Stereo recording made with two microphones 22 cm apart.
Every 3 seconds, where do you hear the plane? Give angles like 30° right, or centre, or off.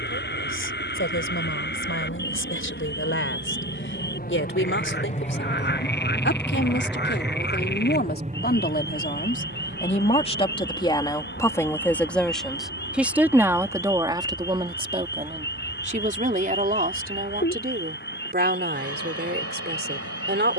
70° left, 40° left, 20° right, 50° right, 70° right, 70° right, 80° right.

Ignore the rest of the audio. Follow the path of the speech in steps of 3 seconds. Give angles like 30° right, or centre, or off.
70° left, 60° left, 50° left, 20° left, 10° right, 40° right, 50° right.